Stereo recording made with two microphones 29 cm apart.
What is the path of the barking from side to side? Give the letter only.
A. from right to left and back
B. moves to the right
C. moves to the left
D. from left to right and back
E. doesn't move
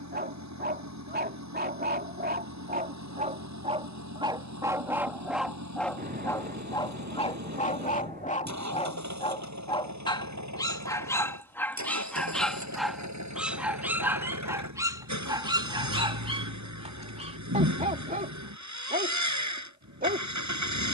A.